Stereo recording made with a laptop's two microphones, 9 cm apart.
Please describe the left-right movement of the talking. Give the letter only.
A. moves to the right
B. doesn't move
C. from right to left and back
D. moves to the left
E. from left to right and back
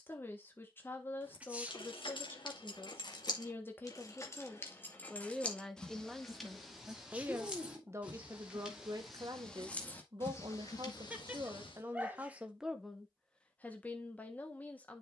E.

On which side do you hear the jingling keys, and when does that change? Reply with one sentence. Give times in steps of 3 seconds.
You can hear the jingling keys on the left from 0 s, in the centre from 6 s, on the left from 9 s and not at all from 12 s.